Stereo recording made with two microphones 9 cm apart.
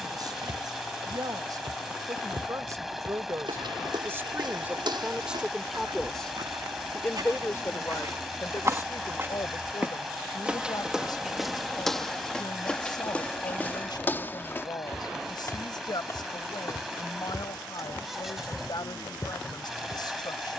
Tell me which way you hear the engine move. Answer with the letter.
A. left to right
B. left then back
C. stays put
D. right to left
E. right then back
C.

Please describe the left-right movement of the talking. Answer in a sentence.
You can hear the talking go from the right side to the left.